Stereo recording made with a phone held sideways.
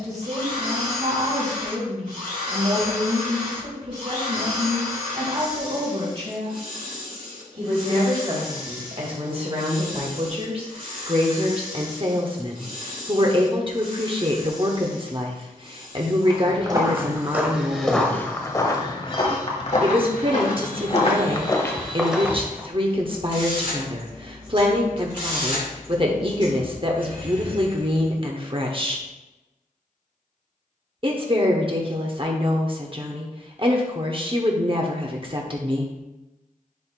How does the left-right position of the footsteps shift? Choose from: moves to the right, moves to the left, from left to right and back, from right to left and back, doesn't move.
from right to left and back.